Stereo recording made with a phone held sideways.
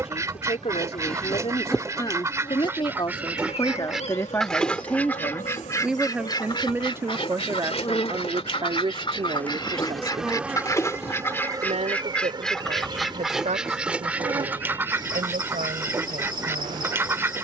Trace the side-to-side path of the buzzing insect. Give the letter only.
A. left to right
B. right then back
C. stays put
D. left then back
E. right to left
D.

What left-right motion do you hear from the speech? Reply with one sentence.
In this clip you hear the speech go from the left side to the right.